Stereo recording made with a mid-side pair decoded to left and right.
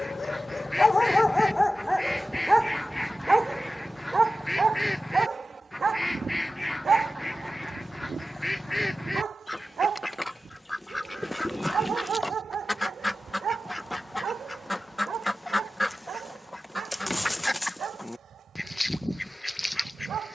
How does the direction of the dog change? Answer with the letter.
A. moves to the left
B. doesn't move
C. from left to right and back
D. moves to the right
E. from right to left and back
D.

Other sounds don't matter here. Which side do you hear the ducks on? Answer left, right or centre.
centre.